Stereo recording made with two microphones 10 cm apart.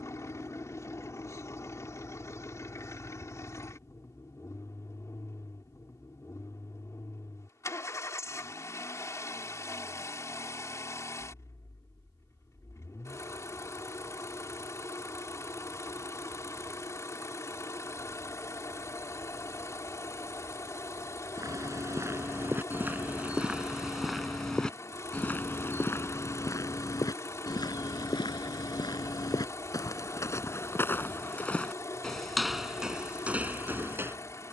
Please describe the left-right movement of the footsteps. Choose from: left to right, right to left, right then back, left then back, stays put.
left then back.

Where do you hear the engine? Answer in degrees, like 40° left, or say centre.
30° left.